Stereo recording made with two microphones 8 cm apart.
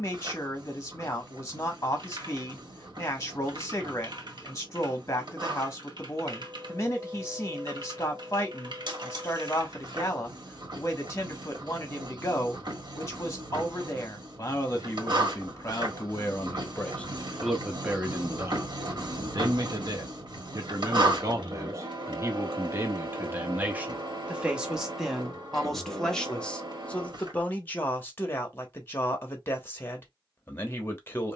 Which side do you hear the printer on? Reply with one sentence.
You can hear the printer on the right.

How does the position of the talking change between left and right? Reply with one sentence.
You can hear the talking go right and come back.